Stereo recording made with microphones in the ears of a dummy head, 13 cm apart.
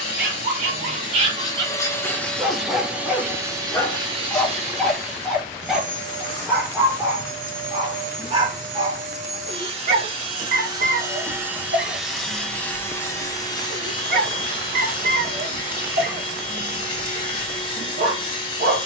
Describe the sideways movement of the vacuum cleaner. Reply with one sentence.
You can hear the vacuum cleaner go right and come back.